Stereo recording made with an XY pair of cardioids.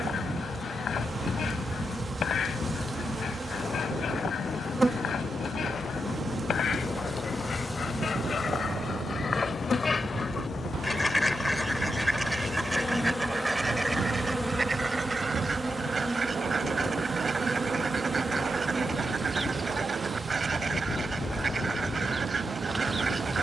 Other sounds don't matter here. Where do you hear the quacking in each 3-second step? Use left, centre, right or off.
left, left, left, left, centre, right, right, right.